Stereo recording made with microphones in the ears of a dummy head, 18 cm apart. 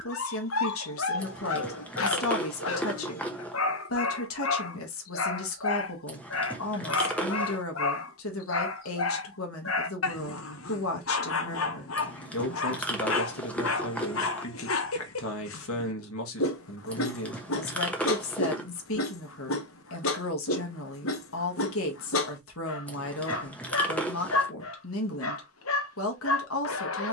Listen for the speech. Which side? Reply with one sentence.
You can hear the speech on the left.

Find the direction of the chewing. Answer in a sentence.
In this clip you hear the chewing in the centre.